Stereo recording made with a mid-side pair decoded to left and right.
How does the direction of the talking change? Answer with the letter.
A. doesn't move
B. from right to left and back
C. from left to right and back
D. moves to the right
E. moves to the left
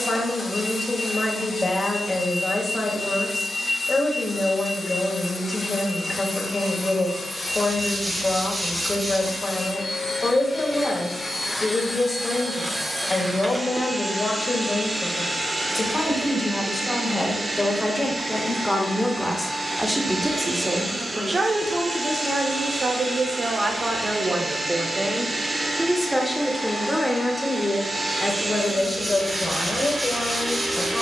C.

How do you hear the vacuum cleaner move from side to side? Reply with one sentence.
In this clip you hear the vacuum cleaner move from left to right.